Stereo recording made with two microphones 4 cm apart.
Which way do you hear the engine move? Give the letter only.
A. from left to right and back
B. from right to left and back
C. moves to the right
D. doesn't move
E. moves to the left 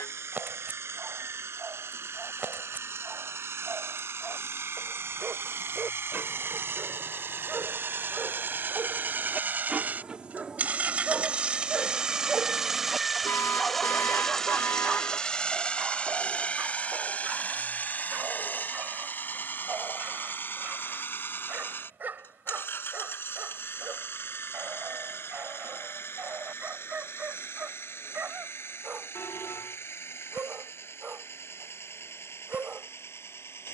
E.